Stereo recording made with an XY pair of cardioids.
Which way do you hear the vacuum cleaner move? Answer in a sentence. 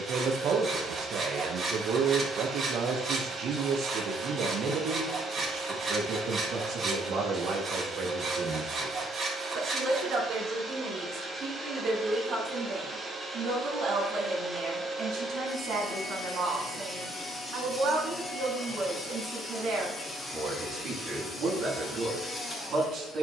In this clip you hear the vacuum cleaner go from the right side to the left.